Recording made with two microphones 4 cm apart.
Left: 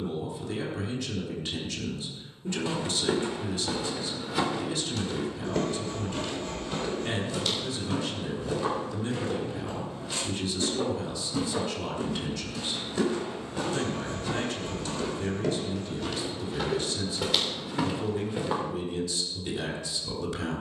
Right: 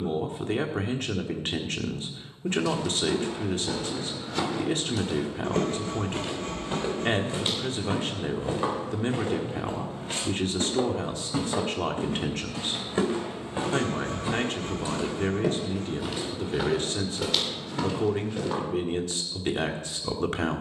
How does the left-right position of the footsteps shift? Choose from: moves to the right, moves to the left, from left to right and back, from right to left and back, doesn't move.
from left to right and back.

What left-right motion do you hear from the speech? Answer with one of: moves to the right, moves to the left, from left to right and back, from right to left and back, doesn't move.
doesn't move.